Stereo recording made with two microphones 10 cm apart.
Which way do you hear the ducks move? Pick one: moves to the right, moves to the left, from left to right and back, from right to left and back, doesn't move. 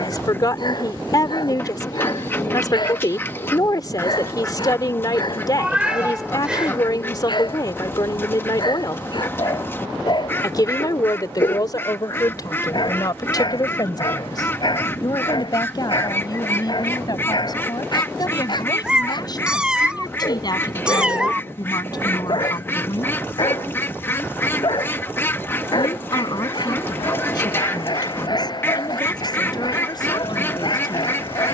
doesn't move.